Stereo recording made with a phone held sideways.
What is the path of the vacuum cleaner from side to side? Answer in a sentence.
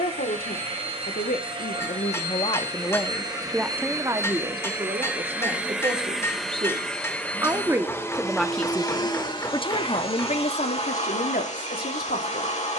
In this clip you hear the vacuum cleaner move from right to left.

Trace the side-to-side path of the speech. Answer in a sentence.
In this clip you hear the speech go right and come back.